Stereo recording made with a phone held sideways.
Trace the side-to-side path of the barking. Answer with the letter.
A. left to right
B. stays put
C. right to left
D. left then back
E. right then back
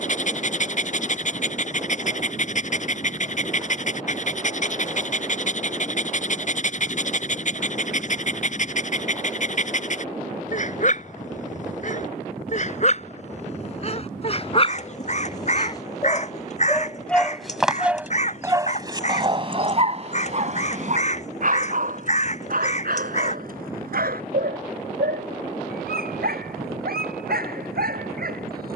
A.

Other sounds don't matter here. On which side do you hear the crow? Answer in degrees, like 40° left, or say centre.
50° left.